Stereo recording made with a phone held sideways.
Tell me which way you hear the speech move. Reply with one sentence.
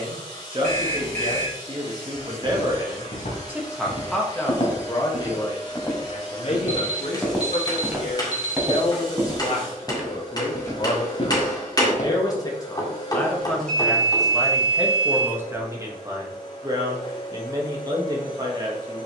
In this clip you hear the speech move from right to left and back again.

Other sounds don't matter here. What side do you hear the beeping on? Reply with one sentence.
In this clip you hear the beeping on the right.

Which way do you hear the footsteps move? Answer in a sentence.
You can hear the footsteps move from left to right and back again.